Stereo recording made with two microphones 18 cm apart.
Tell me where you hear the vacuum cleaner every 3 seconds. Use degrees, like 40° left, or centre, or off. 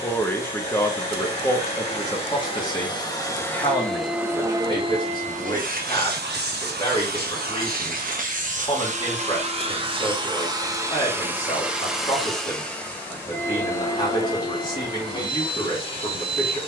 30° left, 20° right, 60° right, 20° right, 10° left, 30° left.